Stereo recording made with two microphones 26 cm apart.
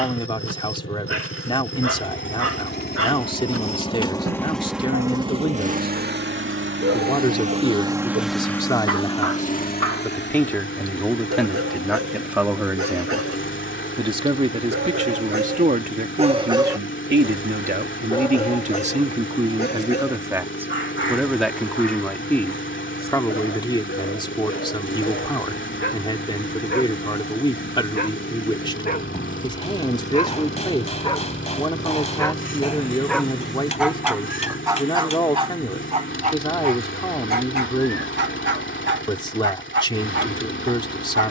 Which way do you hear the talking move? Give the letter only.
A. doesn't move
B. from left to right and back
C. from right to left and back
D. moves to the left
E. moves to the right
B.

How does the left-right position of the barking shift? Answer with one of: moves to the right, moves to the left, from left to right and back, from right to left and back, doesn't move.
from right to left and back.